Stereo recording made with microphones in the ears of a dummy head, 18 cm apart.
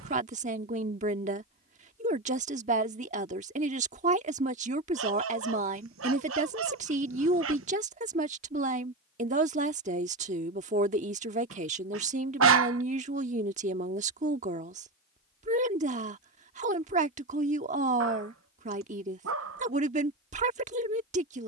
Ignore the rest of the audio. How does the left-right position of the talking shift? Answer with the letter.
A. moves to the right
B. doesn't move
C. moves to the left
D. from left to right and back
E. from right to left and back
B.